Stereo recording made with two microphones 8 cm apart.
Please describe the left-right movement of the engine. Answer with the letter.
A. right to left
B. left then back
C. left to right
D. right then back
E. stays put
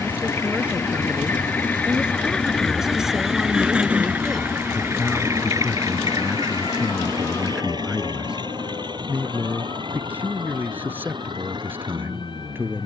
C.